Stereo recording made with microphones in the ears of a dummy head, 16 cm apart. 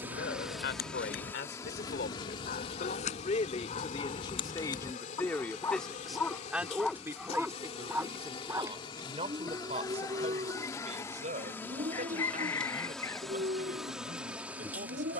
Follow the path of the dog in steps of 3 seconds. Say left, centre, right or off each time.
left, left, centre, right, right.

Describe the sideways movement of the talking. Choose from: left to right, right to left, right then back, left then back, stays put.
left to right.